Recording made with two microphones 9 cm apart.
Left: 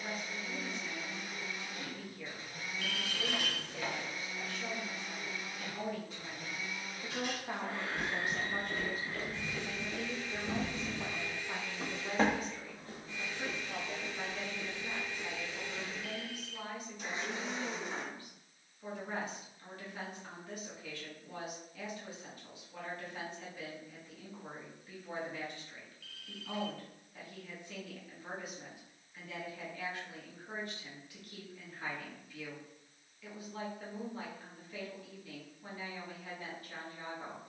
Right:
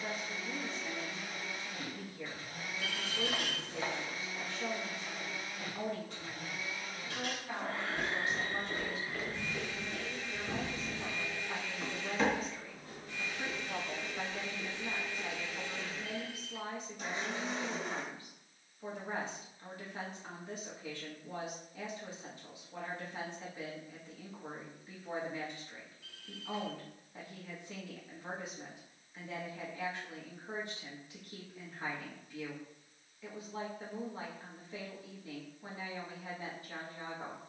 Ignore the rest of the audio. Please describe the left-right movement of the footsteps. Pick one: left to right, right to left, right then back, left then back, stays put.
left then back.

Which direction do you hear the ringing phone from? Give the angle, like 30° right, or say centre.
30° right.